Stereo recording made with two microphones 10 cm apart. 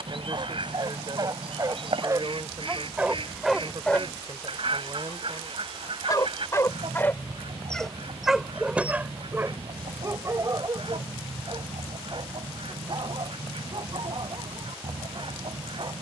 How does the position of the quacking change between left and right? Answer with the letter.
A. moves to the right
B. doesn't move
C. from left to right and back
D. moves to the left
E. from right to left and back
B.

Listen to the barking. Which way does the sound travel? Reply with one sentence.
In this clip you hear the barking go left and come back.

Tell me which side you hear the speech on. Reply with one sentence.
You can hear the speech on the right.